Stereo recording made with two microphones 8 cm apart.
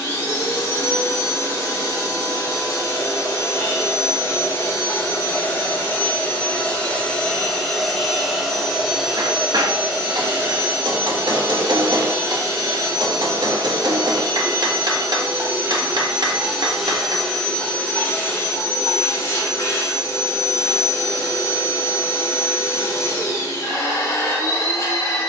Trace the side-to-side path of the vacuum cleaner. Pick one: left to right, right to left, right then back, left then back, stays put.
right then back.